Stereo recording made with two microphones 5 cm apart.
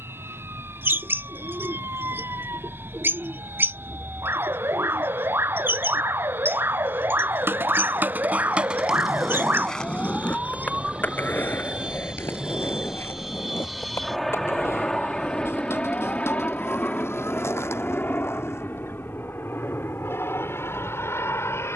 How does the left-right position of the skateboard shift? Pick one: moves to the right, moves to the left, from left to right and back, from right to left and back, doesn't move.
moves to the left.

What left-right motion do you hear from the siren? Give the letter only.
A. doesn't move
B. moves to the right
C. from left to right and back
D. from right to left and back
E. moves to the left
E.